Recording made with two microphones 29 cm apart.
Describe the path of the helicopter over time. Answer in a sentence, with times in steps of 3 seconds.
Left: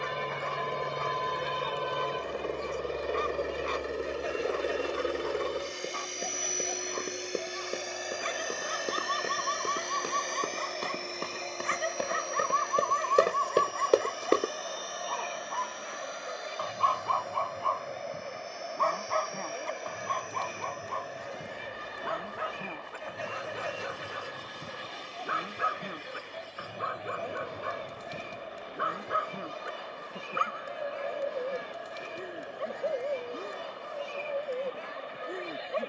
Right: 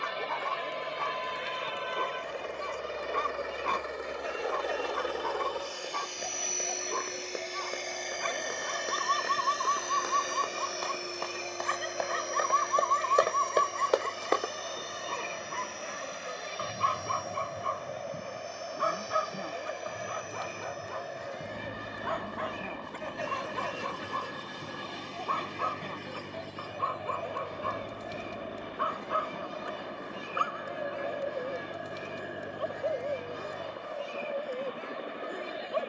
You can hear the helicopter on the left from 0 s, in the centre from 6 s and on the right from 12 s.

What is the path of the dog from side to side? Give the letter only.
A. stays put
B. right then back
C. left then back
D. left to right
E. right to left
E.